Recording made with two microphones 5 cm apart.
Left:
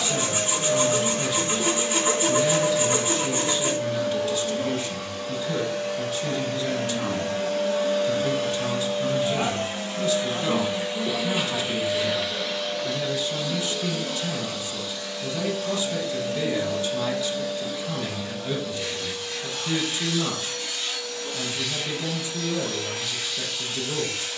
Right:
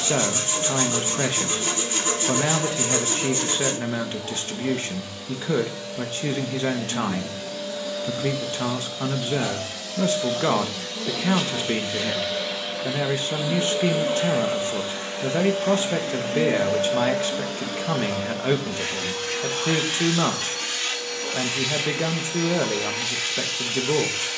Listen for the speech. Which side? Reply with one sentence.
You can hear the speech on the right.